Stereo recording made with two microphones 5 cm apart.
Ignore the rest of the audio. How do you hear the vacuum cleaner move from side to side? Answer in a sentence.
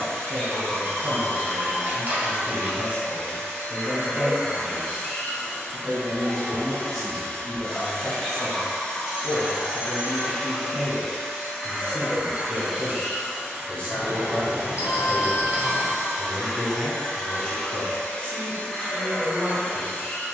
You can hear the vacuum cleaner go right and come back.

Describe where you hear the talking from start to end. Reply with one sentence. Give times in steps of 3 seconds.
In this clip you hear the talking on the right from 0 s, in the centre from 6 s and on the left from 9 s.